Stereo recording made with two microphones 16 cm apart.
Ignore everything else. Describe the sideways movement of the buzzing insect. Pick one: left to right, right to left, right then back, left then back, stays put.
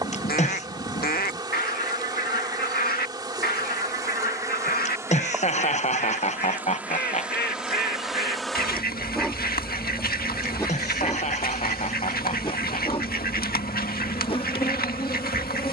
right to left.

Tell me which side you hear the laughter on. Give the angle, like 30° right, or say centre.
40° left.